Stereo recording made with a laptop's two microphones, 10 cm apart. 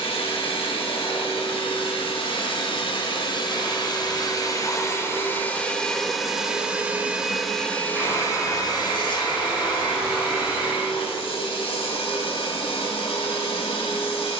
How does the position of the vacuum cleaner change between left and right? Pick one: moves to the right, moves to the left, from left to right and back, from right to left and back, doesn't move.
from left to right and back.